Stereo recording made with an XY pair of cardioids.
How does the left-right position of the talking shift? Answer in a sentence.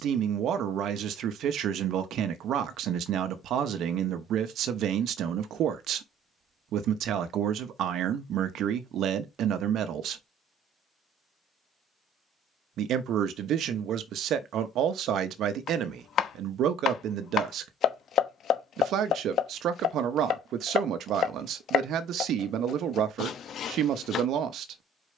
In this clip you hear the talking stay in one place.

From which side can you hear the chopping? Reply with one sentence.
In this clip you hear the chopping on the left.